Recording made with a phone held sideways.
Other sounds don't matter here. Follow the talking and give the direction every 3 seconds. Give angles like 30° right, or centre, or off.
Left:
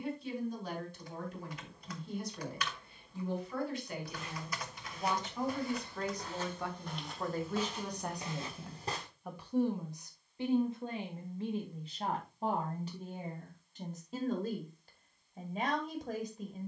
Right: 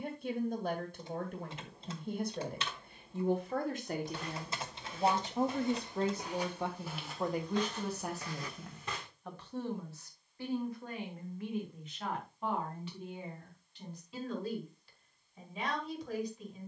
50° right, 40° right, 10° right, 20° left, 40° left, 50° left.